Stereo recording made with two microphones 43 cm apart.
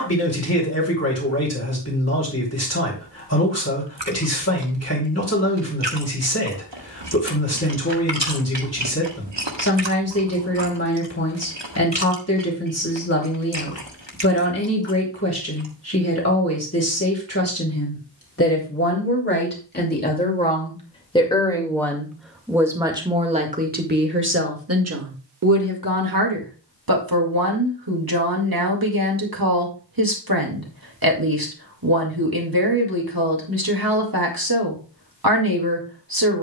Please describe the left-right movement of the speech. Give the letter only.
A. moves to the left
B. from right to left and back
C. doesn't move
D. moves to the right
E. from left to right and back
D.